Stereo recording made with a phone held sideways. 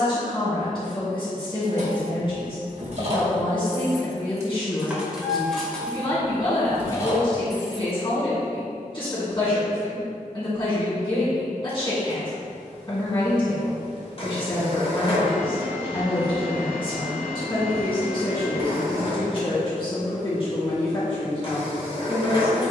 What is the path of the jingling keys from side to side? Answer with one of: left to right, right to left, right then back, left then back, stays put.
right to left.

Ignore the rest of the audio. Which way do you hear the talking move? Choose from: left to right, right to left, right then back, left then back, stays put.
stays put.